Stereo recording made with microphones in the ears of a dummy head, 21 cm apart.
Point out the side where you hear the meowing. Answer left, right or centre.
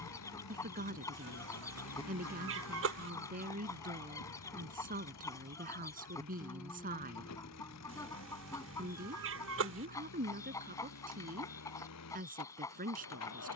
right.